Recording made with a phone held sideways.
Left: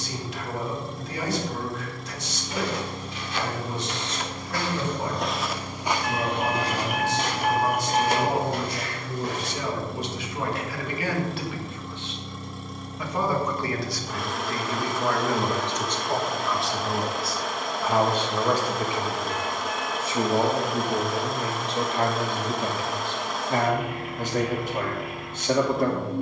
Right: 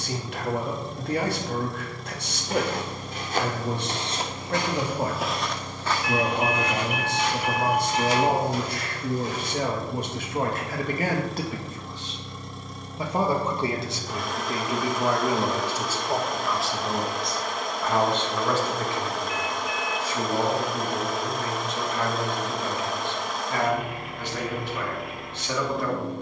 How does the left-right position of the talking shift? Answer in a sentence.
You can hear the talking go from the right side to the left.